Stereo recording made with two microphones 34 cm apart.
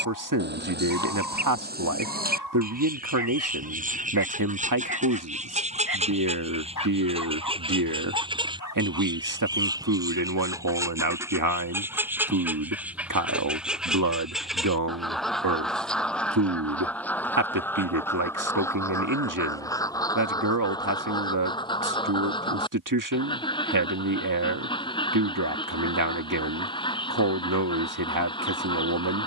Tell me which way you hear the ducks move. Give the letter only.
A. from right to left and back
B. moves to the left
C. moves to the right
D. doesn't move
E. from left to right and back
B.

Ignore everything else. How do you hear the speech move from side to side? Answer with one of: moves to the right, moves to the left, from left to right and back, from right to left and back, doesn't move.
doesn't move.